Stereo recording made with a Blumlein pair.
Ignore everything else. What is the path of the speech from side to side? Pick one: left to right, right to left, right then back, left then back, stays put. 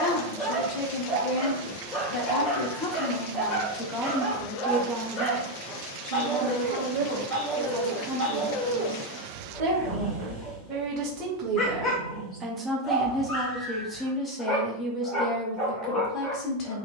right then back.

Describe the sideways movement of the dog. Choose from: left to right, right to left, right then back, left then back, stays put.
stays put.